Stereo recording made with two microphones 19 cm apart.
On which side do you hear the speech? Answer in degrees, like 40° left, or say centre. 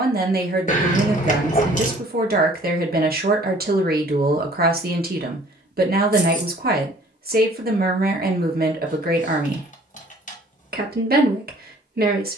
50° right.